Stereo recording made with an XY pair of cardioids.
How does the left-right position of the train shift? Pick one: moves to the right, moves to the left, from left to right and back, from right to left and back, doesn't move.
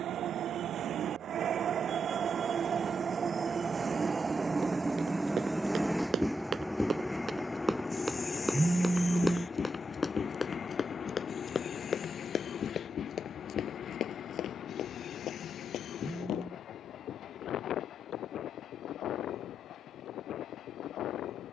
moves to the left.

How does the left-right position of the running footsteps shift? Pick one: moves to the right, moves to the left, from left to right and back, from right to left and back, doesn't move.
moves to the left.